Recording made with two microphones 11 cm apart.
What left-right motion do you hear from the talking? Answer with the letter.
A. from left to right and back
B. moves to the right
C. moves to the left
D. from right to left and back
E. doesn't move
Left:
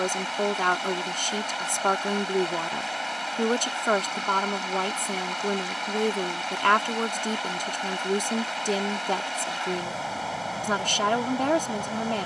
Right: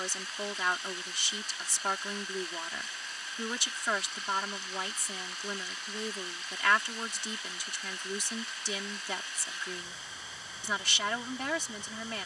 E.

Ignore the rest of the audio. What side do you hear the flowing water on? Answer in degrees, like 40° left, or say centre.
70° left.